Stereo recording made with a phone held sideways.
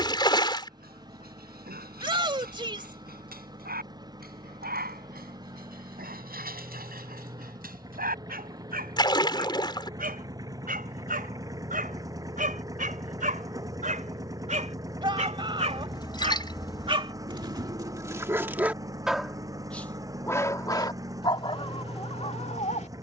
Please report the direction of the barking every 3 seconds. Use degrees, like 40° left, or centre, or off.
70° right, 70° right, 70° right, 60° right, 60° right, 30° right, centre, 40° left.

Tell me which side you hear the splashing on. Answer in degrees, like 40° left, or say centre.
30° left.